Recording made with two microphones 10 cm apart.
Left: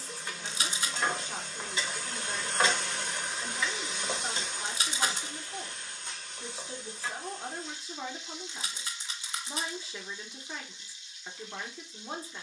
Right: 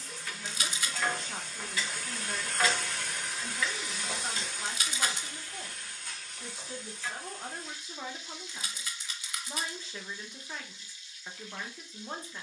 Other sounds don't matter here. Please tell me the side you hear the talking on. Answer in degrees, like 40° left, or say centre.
centre.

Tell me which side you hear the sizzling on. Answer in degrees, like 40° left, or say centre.
20° left.